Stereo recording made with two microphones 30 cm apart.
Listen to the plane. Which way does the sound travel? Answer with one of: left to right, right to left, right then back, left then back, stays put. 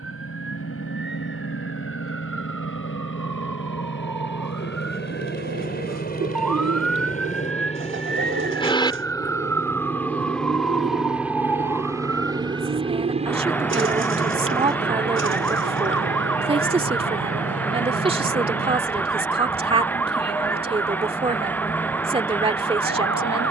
left to right.